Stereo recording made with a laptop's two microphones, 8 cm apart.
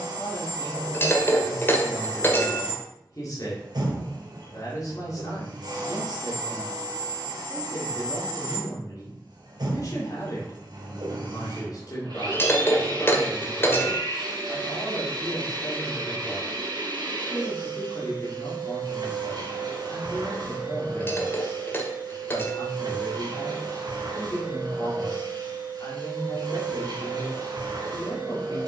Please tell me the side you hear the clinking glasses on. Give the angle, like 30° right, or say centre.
30° left.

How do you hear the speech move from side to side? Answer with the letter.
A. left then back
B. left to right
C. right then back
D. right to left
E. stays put
E.